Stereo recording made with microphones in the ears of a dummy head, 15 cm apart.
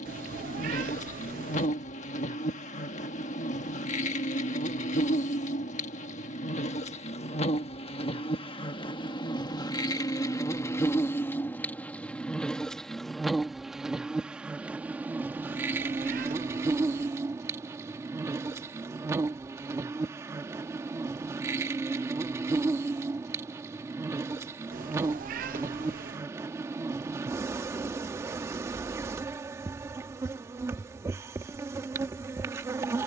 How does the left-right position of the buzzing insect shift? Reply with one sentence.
You can hear the buzzing insect travel towards the right.